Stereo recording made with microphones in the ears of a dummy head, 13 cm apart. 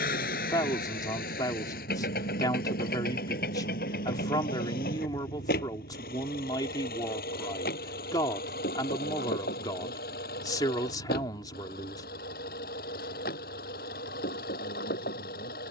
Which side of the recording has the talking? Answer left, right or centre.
left.